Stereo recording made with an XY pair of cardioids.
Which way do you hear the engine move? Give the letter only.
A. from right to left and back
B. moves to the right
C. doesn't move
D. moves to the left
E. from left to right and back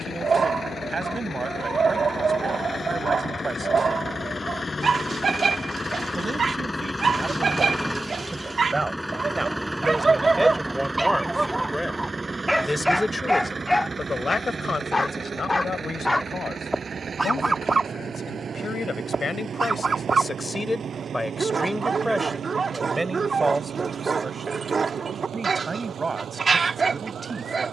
B.